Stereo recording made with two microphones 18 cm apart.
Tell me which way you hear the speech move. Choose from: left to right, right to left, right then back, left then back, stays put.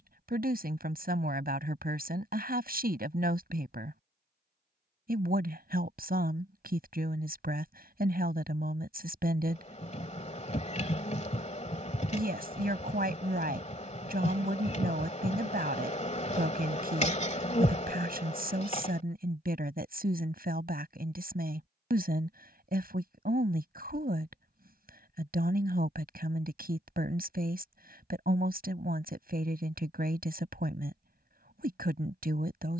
stays put.